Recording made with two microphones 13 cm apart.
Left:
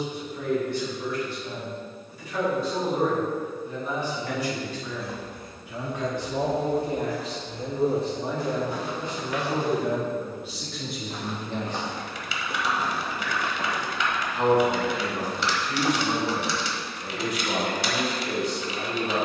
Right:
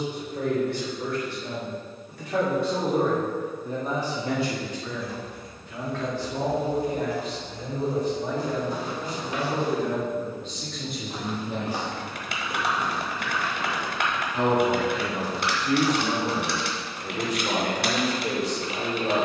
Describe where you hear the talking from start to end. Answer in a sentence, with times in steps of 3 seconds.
You can hear the talking on the right from 0 s, on the left from 6 s, in the centre from 9 s and on the right from 12 s.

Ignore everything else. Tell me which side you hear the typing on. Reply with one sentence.
In this clip you hear the typing on the right.